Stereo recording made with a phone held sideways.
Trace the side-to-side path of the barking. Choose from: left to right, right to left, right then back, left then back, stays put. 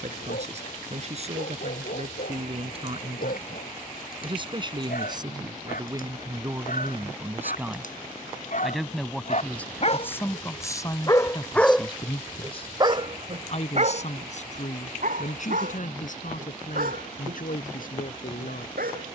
left to right.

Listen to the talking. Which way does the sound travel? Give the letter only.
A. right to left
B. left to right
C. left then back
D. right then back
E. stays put
A.